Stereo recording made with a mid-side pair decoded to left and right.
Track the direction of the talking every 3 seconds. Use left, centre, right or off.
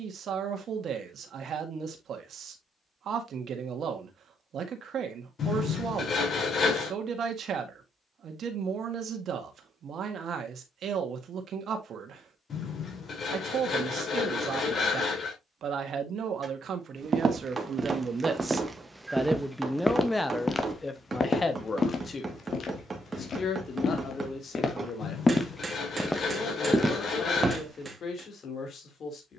right, right, right, right, right, right, centre, left, left, left.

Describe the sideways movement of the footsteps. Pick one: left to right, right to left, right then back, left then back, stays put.
left then back.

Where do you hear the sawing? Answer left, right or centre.
left.